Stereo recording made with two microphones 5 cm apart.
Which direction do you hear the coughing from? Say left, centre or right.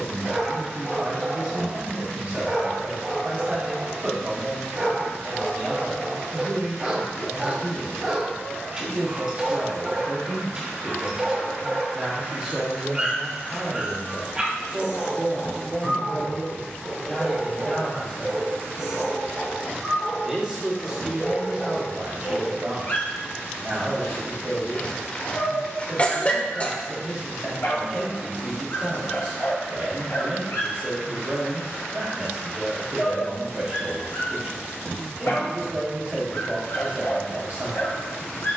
left.